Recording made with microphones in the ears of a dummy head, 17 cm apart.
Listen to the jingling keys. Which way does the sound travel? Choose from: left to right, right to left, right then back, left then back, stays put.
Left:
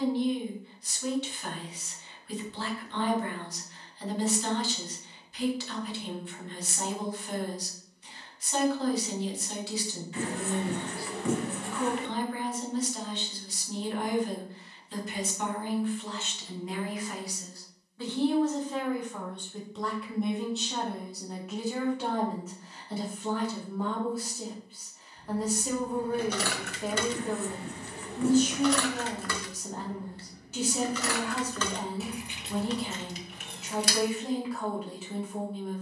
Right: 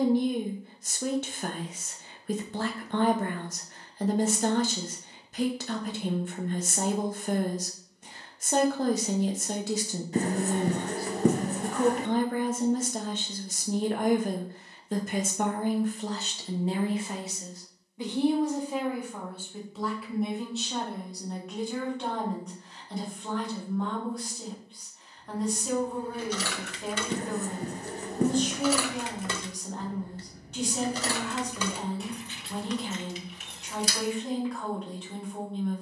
right then back.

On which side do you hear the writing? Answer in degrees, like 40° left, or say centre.
30° right.